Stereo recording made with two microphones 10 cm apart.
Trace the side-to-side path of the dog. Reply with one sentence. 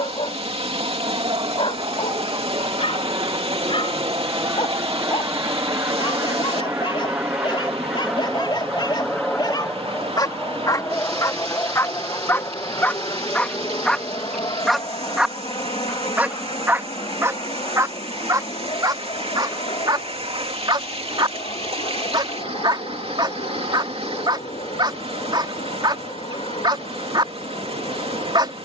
In this clip you hear the dog go from the left side to the right.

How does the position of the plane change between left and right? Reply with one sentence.
In this clip you hear the plane move from right to left.